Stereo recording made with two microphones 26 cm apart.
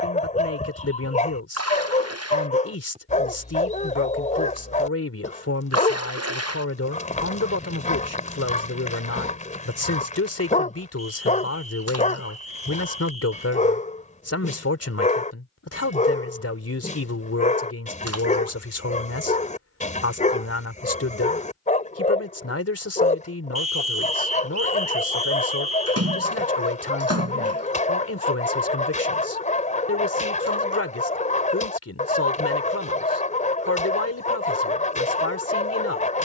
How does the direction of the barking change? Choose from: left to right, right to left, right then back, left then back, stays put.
stays put.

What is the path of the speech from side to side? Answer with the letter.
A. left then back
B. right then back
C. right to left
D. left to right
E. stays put
E.